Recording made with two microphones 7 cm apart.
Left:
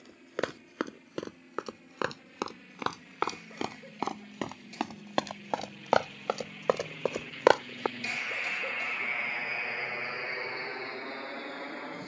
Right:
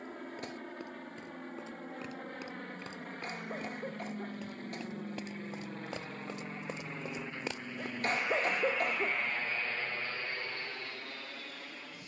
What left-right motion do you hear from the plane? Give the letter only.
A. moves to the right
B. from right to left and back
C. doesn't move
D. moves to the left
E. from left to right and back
D.